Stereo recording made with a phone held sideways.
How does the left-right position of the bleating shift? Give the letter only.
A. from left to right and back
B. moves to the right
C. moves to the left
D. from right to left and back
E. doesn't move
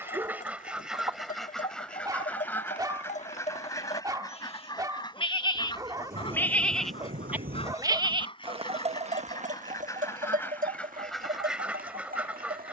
B.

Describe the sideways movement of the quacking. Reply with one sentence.
In this clip you hear the quacking go left and come back.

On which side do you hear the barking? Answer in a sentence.
You can hear the barking on the right.